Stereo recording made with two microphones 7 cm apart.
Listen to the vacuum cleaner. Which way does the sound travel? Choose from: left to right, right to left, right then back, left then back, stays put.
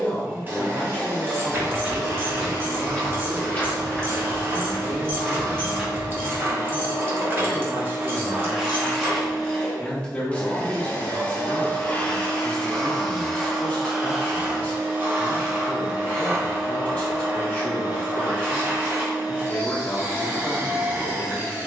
left then back.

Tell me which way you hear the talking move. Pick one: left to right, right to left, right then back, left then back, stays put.
right then back.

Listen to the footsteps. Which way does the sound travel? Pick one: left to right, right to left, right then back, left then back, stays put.
left then back.